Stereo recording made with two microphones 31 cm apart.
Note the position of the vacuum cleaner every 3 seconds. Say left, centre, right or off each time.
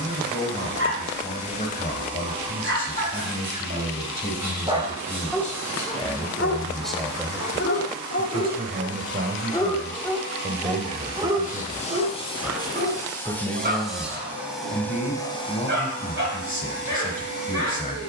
left, left, left, left, centre, left.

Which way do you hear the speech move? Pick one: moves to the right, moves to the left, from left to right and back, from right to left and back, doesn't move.
from left to right and back.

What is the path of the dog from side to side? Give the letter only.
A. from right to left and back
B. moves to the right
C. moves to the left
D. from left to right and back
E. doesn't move
A.